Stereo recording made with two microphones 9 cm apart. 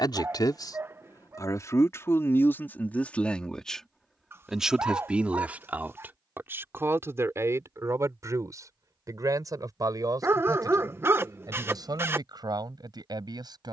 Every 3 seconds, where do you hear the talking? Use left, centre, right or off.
left, centre, right, right, right.